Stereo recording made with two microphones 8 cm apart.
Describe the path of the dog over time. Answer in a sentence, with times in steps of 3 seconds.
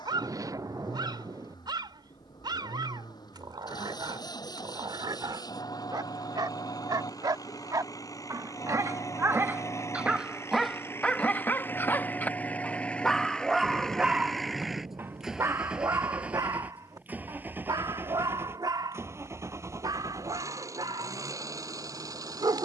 You can hear the dog on the right from 0 s, in the centre from 9 s and on the right from 15 s.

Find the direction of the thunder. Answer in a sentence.
You can hear the thunder on the right.